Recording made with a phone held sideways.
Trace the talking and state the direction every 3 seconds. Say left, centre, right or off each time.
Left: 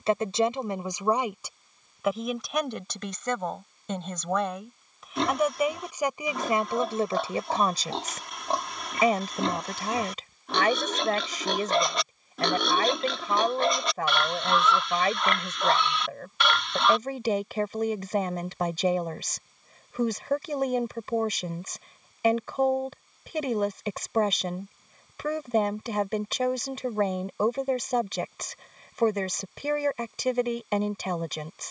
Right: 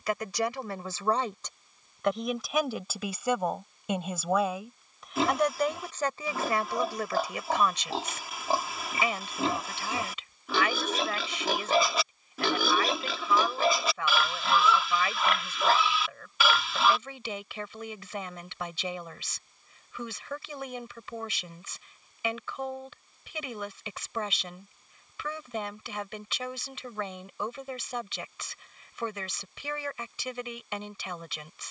centre, centre, left, left, left, left, left, left, left, left, left.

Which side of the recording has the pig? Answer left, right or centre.
centre.